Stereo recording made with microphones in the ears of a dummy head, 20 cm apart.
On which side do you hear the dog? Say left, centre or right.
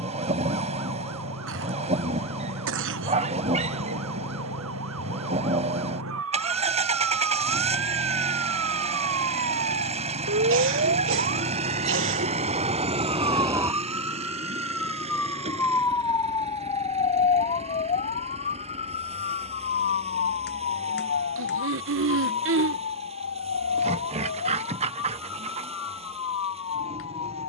right.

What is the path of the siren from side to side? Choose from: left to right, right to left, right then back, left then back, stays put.
right to left.